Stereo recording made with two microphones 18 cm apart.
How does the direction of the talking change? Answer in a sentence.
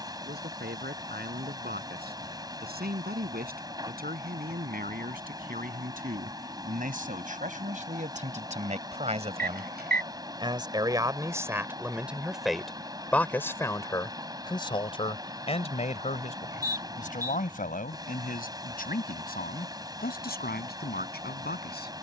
In this clip you hear the talking go from the right side to the left.